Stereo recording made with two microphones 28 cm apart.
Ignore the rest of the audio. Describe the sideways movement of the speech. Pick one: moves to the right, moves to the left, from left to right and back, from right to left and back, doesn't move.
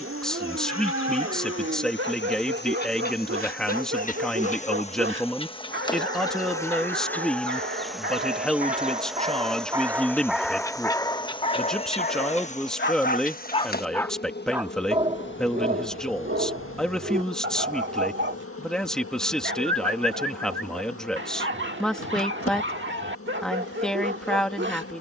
doesn't move.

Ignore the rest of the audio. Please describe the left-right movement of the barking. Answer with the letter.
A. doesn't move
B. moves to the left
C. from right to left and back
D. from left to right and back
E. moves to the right
C.